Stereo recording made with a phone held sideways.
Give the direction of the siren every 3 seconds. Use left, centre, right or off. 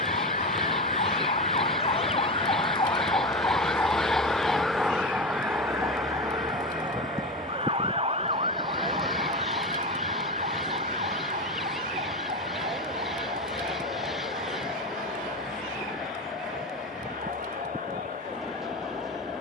left, centre, right, right, right, right, right.